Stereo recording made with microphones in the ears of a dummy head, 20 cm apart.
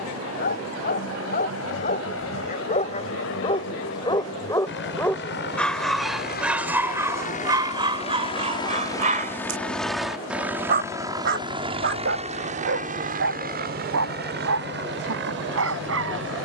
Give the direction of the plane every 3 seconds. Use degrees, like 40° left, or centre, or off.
70° left, 60° left, 30° left, 10° right, 40° right, 50° right.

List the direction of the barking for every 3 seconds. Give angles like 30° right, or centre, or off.
40° left, 20° left, 20° right, 40° right, 60° right, 70° right.